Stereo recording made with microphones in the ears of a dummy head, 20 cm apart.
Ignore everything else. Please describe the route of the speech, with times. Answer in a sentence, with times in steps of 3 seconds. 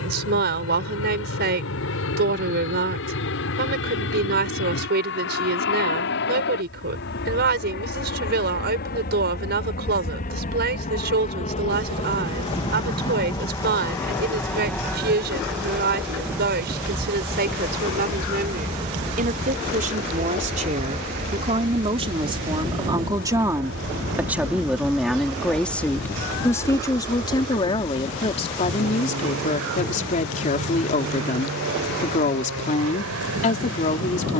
In this clip you hear the speech on the right from 0 s, in the centre from 24 s and on the left from 27 s.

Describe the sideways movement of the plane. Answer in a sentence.
In this clip you hear the plane move from left to right.